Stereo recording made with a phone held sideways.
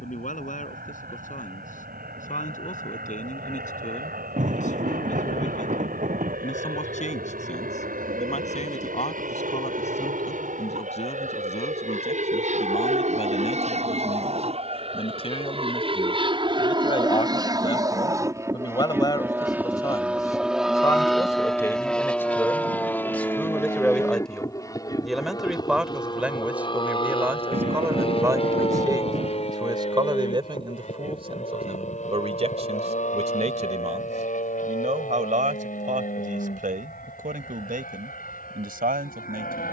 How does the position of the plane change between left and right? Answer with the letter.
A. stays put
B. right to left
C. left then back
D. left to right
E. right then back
B.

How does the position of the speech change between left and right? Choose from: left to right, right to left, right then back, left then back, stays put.
left to right.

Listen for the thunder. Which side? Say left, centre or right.
right.